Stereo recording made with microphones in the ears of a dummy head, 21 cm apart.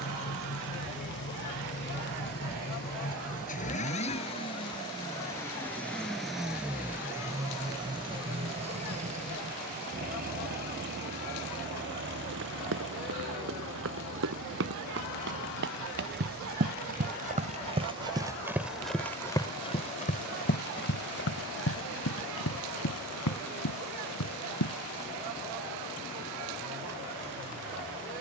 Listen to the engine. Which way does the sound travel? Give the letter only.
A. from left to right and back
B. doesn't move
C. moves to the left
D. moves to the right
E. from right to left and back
D.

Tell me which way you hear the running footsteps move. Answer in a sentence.
You can hear the running footsteps move to the left.